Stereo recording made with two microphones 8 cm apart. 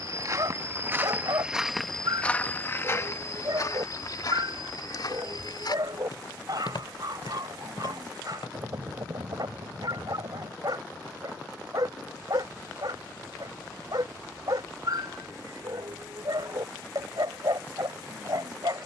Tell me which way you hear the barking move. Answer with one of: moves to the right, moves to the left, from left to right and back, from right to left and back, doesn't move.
doesn't move.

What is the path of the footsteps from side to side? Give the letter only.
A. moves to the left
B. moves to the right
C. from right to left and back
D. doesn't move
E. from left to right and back
A.